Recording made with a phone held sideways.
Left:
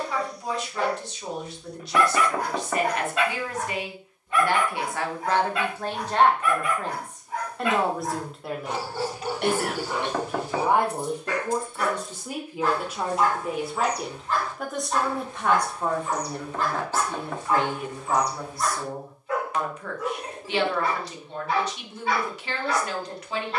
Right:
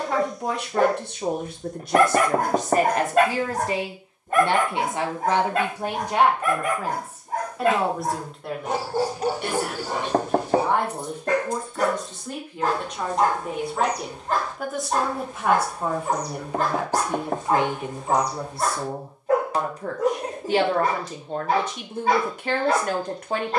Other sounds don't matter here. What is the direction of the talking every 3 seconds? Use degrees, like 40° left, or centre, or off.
50° right, 30° right, centre, 10° left, centre, 10° right, 30° right, 50° right.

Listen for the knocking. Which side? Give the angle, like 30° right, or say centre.
40° right.